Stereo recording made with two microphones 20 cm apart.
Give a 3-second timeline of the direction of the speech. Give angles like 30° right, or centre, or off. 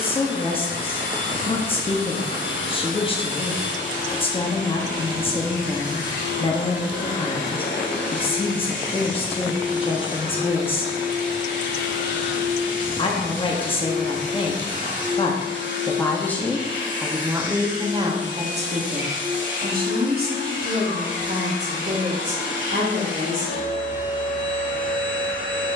30° left, 30° left, 30° left, 30° left, 30° left, centre, 40° right, 60° right, off.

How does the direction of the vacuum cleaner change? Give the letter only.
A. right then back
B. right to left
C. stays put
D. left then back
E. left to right
C.